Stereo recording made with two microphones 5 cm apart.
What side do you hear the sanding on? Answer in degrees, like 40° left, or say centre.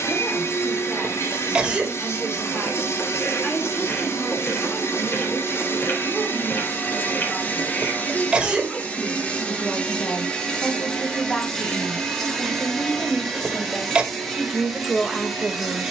40° left.